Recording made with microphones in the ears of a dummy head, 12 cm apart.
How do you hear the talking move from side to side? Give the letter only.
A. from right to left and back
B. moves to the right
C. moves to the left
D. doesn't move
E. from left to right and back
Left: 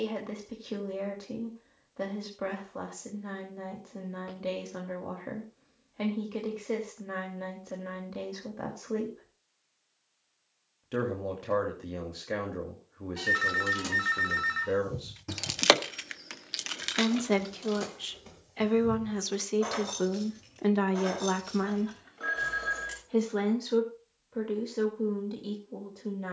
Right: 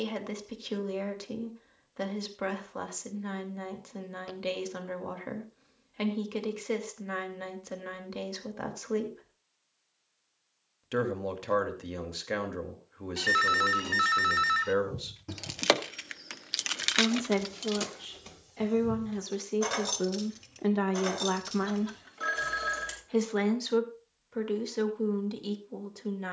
A.